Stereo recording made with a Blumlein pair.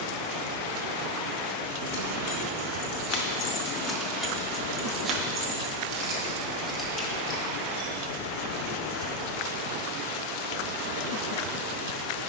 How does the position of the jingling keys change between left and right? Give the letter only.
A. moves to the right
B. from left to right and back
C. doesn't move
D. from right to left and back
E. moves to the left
B.